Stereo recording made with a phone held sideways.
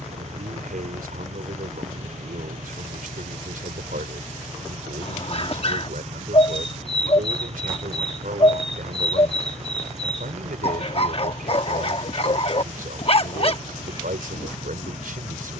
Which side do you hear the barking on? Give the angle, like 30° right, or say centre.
40° left.